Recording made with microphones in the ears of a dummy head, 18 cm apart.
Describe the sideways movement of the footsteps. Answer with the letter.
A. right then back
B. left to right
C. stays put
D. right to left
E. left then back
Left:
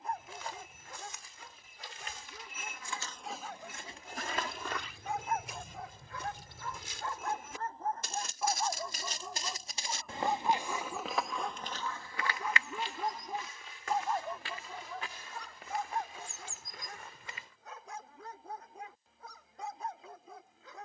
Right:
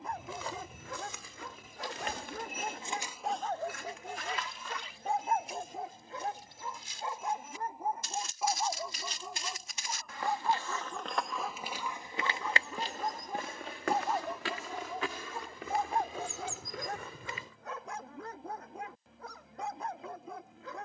E.